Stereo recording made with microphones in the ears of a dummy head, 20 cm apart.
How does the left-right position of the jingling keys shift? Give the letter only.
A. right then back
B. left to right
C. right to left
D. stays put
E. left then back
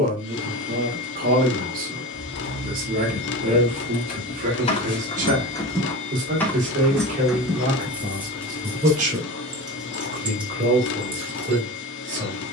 B.